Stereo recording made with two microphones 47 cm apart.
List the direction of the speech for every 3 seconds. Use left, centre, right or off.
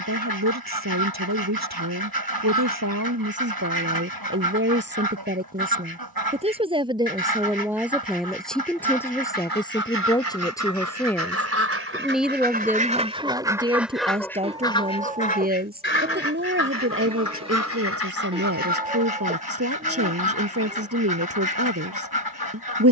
right, right, centre, centre, centre, right, right, right.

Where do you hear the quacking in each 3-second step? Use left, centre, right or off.
right, right, right, right, centre, left, left, left.